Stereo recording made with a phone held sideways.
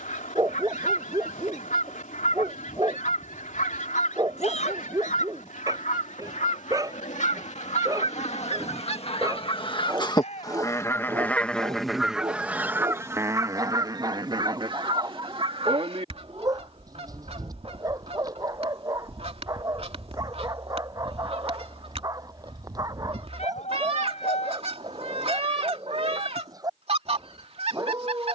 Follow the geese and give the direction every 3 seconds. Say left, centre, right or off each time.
left, left, left, left, right, right, right, right, right, right.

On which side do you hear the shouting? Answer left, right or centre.
left.